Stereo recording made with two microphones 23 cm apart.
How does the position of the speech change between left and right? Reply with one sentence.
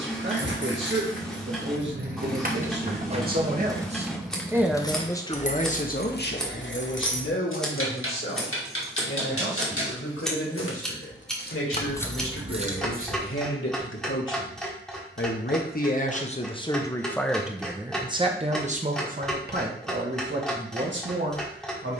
You can hear the speech go left and come back.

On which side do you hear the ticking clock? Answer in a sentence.
You can hear the ticking clock in the centre.